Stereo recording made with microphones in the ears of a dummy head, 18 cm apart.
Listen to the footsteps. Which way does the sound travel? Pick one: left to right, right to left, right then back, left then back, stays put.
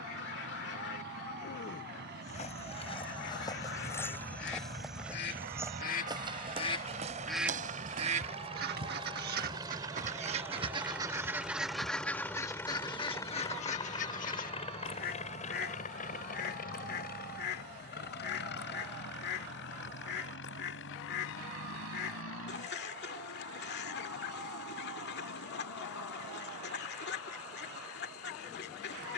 left to right.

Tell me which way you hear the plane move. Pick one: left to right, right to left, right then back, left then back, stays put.
right to left.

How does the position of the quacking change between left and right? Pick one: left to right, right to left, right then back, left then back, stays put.
right then back.